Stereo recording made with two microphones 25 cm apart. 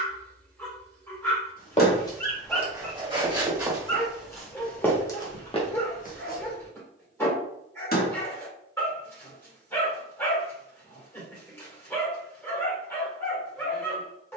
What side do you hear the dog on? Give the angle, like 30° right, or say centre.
10° left.